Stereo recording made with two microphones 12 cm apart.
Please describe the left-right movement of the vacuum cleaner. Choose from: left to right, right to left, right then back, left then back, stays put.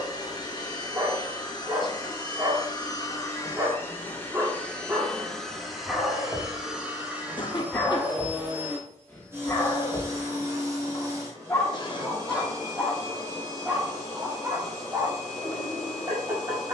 left to right.